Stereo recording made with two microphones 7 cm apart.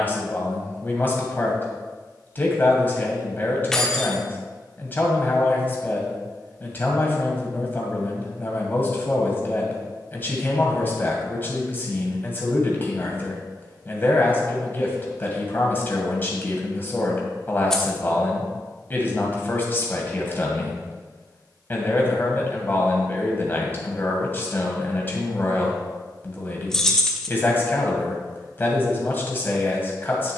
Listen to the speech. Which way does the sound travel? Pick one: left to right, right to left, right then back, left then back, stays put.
stays put.